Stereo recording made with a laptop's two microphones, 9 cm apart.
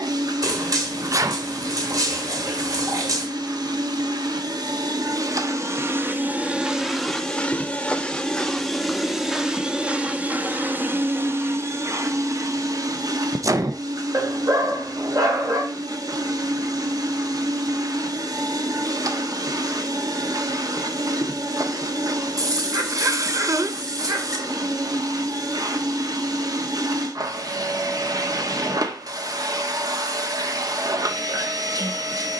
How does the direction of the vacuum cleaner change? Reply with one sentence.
In this clip you hear the vacuum cleaner move from right to left and back again.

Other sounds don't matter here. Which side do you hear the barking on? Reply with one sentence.
In this clip you hear the barking on the right.